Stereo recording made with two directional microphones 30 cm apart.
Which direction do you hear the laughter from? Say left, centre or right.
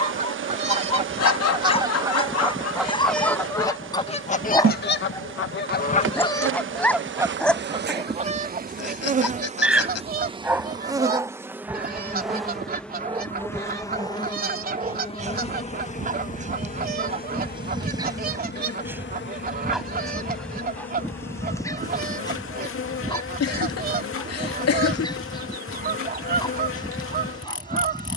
left.